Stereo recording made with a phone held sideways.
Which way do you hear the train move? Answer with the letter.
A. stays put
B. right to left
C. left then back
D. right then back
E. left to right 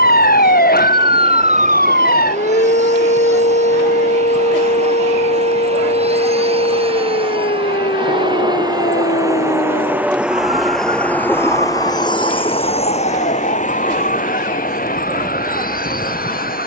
B.